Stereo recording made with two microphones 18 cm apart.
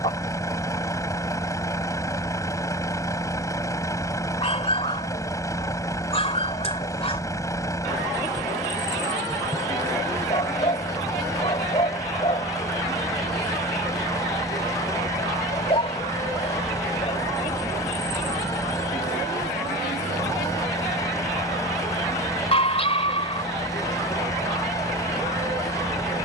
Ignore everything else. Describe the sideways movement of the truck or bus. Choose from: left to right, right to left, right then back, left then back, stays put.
stays put.